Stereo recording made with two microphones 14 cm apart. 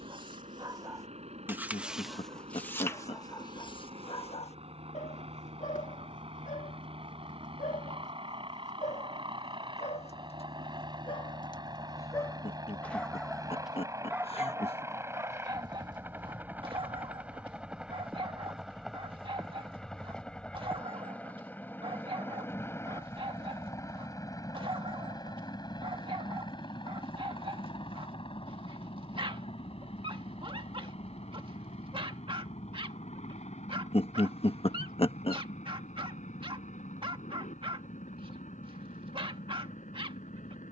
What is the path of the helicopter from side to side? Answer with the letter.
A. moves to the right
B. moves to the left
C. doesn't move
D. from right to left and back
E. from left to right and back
B.